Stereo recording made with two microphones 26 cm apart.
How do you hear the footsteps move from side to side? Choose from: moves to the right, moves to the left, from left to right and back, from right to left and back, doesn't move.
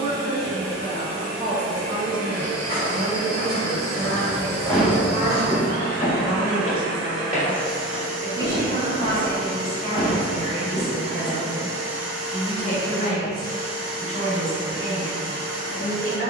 from left to right and back.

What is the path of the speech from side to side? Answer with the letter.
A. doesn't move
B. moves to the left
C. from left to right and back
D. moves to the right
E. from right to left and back
B.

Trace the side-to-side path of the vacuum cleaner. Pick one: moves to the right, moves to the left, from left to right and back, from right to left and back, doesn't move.
from left to right and back.